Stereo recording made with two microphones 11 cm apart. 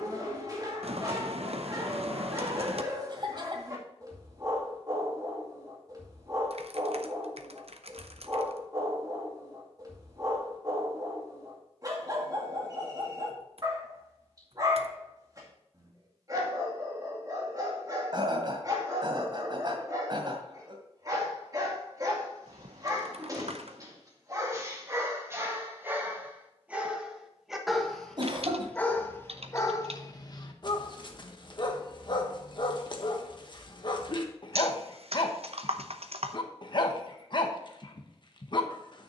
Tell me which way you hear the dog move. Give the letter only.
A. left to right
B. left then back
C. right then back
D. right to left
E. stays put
D.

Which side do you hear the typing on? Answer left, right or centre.
right.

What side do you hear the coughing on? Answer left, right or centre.
right.